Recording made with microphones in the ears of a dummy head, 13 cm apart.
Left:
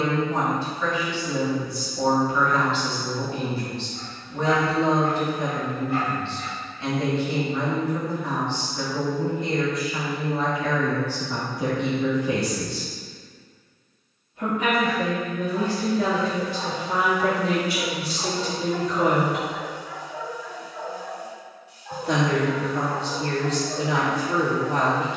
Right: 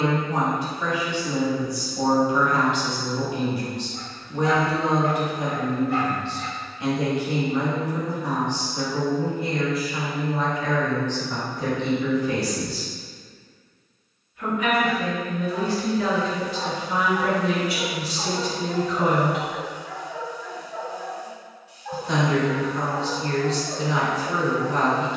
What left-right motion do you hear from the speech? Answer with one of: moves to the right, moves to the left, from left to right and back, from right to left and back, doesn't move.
moves to the left.